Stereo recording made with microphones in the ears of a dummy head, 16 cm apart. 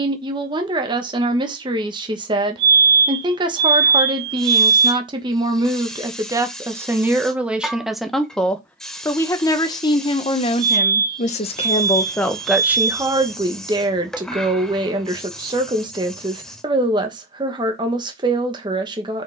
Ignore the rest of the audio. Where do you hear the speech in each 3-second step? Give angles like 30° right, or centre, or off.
30° right, 20° right, 10° right, 30° left, 20° right, 20° right, 20° right.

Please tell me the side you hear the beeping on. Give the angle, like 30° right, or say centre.
60° right.